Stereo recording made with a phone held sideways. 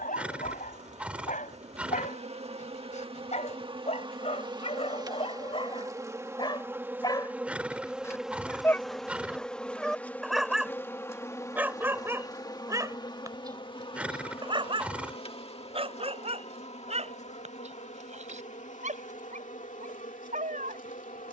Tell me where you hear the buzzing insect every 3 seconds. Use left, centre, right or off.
right, right, centre, centre, left, left, left.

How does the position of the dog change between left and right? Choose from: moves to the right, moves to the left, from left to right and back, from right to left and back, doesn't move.
moves to the right.